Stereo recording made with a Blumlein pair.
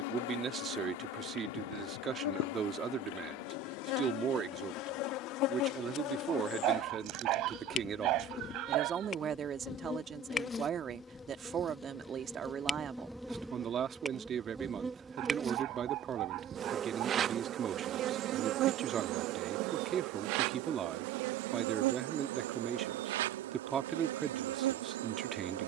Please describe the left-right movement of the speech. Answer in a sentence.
In this clip you hear the speech stay in one place.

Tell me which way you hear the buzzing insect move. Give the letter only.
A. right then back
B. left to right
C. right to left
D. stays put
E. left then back
B.